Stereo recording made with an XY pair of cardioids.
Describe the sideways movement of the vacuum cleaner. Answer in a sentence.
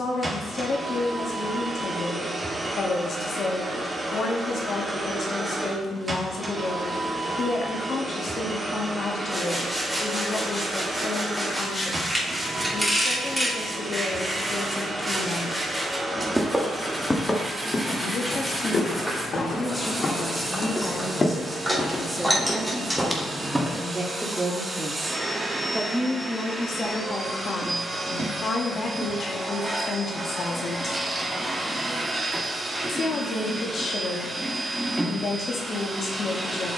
In this clip you hear the vacuum cleaner stay put.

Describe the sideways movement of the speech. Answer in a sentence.
In this clip you hear the speech go right and come back.